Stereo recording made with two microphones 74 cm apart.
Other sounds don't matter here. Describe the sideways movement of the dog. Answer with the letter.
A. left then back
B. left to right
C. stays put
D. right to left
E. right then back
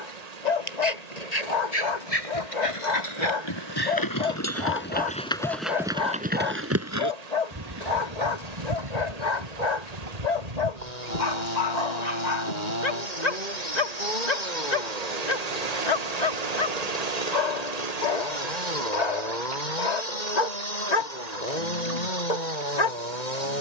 C.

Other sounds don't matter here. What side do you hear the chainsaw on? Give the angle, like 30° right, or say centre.
70° left.